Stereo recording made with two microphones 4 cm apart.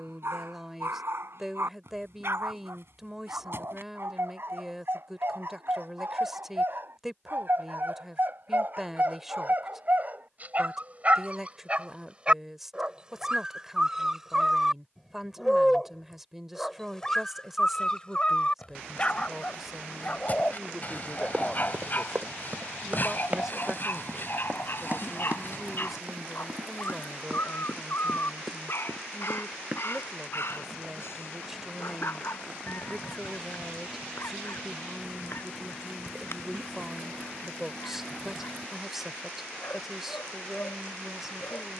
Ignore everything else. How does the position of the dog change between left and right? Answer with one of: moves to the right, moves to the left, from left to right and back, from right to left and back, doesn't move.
moves to the left.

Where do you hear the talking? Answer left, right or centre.
centre.